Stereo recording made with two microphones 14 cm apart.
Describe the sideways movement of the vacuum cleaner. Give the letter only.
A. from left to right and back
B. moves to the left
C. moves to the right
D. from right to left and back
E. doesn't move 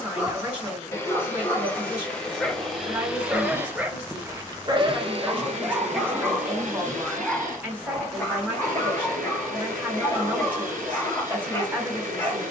C.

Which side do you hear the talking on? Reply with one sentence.
In this clip you hear the talking in the centre.